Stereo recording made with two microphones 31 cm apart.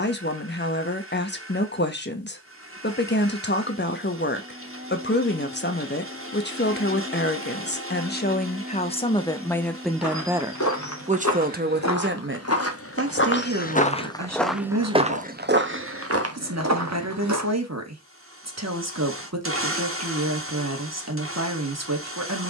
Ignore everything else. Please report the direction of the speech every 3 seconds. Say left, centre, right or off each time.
left, left, left, centre, right, right, right, right.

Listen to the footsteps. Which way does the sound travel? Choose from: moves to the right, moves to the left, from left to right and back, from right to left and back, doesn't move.
moves to the right.